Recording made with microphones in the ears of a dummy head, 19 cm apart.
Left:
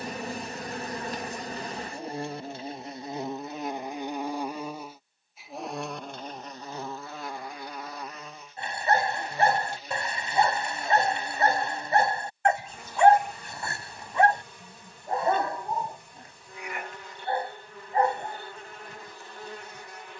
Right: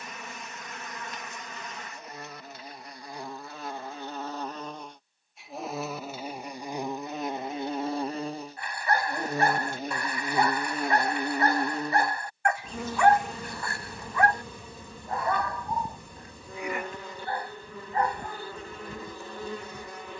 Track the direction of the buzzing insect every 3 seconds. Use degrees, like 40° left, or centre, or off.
30° left, 10° left, 20° right, 50° right, 70° right, 70° right, 70° right.